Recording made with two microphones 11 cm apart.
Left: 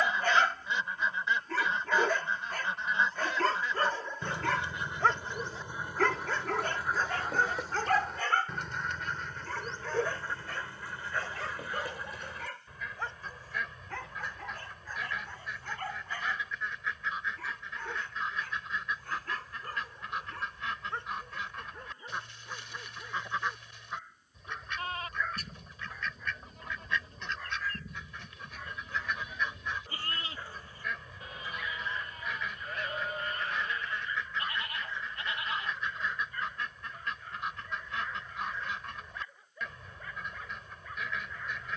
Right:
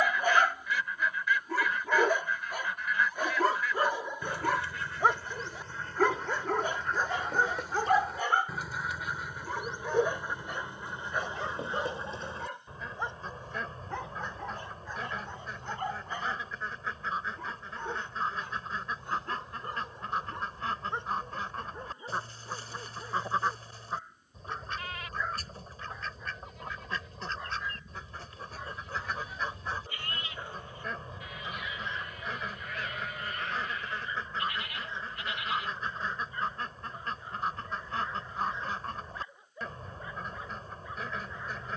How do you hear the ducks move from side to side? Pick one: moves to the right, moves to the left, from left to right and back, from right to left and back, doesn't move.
moves to the right.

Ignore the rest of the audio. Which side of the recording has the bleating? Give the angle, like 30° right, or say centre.
30° left.